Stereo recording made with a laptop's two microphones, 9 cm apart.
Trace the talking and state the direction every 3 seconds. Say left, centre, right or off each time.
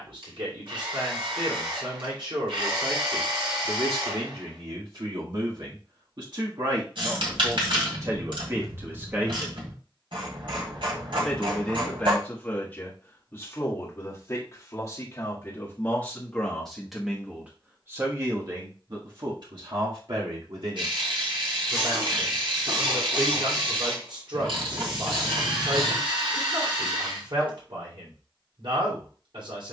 right, right, right, centre, left, centre, right, right, right, right.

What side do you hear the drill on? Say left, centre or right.
right.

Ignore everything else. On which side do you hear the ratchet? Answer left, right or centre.
right.